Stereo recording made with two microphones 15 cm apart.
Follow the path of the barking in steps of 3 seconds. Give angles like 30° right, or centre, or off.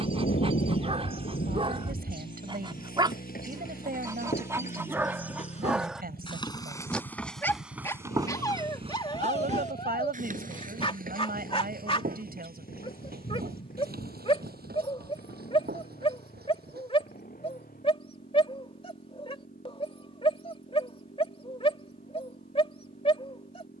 30° right, 20° right, 20° left, 30° left, 40° left, 40° left, 40° left, 40° left.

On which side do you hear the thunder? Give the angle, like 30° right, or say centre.
80° left.